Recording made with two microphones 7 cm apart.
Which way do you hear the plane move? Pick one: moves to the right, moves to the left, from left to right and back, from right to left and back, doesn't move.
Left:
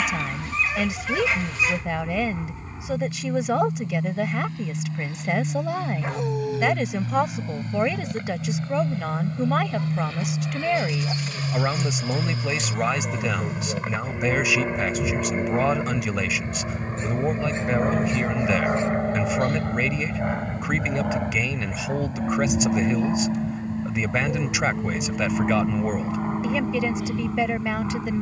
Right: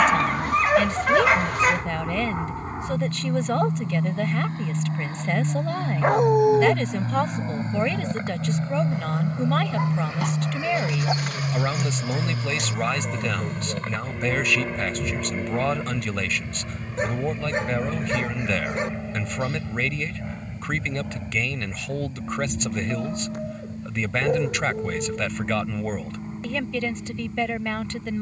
moves to the left.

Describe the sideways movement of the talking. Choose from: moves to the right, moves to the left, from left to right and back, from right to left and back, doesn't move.
doesn't move.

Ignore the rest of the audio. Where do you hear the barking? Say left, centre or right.
right.